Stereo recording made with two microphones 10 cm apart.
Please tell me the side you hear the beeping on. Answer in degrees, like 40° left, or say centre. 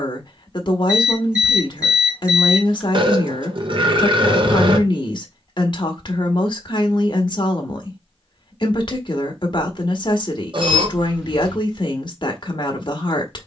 10° right.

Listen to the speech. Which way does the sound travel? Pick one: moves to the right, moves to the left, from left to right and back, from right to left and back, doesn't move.
doesn't move.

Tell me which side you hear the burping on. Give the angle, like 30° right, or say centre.
50° right.